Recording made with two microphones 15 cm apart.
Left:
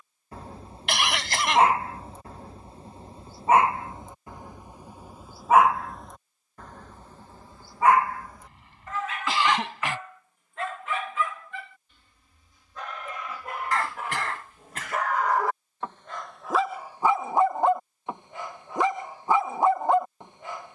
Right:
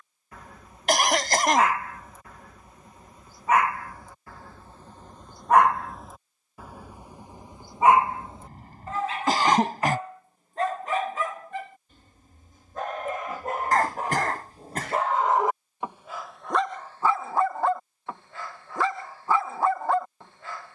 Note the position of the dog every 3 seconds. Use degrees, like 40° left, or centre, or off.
30° left, 20° left, 20° right, 40° right, 40° right, centre, 20° left.